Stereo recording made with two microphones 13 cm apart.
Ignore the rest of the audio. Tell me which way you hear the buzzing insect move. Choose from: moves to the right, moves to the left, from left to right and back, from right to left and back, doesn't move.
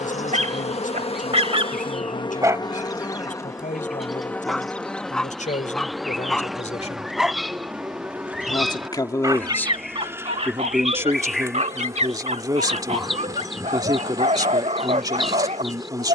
moves to the right.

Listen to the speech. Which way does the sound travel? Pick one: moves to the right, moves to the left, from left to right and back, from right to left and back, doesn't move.
moves to the right.